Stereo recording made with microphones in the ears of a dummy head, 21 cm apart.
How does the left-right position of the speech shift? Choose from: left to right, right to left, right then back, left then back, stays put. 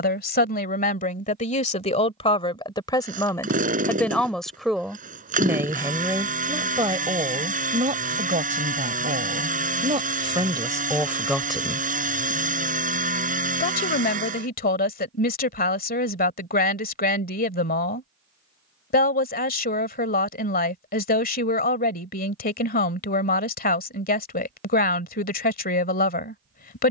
right then back.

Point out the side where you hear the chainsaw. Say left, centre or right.
right.